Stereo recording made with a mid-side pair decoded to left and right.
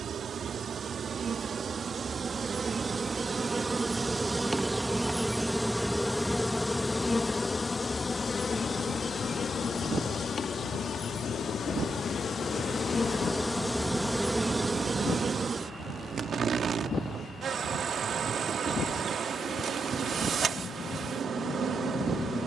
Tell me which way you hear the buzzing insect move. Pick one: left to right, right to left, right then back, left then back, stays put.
left then back.